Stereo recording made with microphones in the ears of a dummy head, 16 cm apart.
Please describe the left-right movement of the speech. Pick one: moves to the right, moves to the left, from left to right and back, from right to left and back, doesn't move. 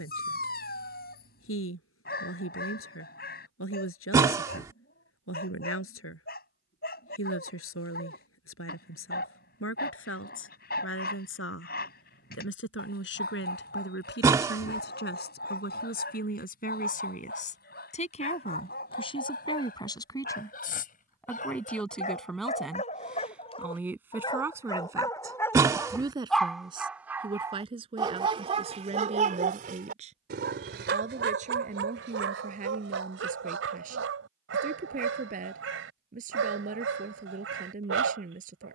moves to the right.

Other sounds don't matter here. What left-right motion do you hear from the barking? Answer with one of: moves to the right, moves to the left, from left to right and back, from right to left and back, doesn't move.
moves to the right.